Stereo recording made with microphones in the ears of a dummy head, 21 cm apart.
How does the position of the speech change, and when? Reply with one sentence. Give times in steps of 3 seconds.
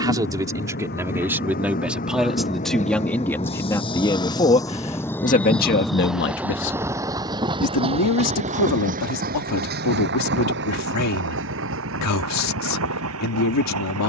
You can hear the speech in the centre from 0 s and on the left from 3 s.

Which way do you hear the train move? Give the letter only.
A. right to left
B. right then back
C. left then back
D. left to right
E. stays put
D.